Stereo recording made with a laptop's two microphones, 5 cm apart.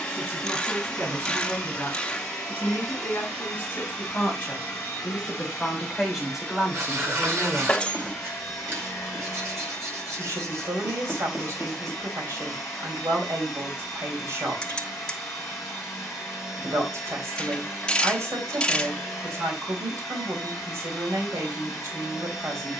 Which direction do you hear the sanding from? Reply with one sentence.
In this clip you hear the sanding on the right.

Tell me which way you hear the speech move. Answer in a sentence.
You can hear the speech go from the left side to the right.